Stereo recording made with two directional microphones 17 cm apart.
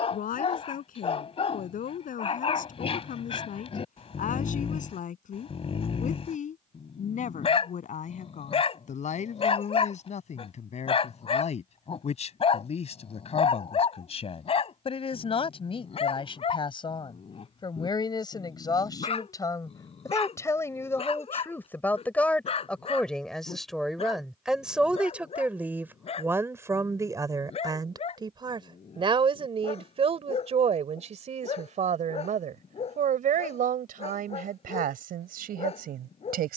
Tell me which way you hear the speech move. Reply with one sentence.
You can hear the speech travel towards the right.